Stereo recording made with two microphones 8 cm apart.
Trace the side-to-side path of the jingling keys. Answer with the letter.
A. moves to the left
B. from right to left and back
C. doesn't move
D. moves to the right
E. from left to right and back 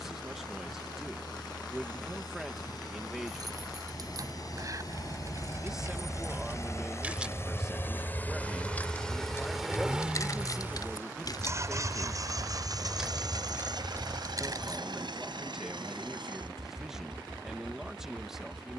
B.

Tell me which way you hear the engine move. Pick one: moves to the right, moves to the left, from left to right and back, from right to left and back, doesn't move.
moves to the right.